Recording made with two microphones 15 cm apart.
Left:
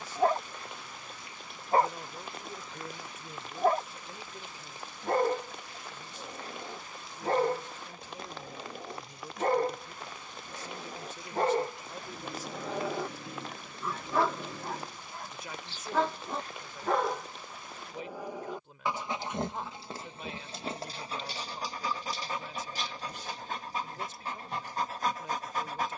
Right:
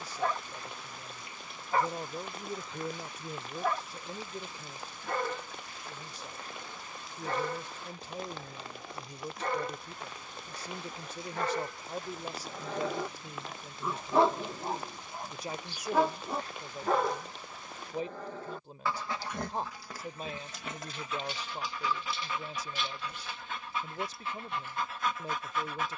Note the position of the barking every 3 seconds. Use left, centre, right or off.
left, left, left, left, centre, centre, left, left, left.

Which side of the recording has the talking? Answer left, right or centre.
right.